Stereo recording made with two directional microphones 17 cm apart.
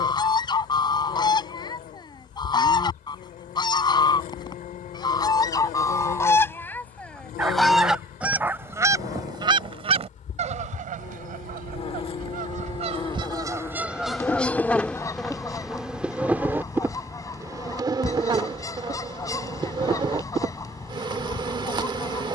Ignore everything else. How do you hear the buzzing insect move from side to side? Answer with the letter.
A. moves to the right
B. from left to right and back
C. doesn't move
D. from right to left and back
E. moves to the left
A.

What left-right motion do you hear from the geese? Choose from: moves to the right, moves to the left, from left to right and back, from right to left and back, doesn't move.
from left to right and back.